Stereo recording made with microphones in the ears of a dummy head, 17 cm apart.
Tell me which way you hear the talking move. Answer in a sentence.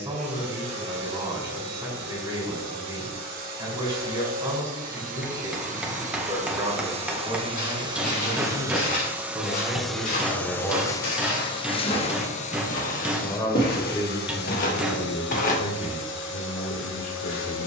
You can hear the talking go from the right side to the left.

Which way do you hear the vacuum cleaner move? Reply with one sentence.
You can hear the vacuum cleaner travel towards the left.